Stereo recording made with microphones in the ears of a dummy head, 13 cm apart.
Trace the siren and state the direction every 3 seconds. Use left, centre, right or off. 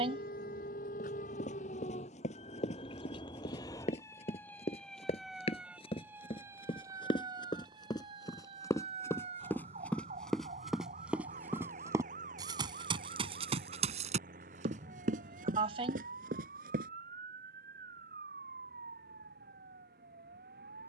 left, centre, right, right, right, right, right.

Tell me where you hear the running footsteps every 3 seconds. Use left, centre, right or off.
left, left, left, centre, right, right, off.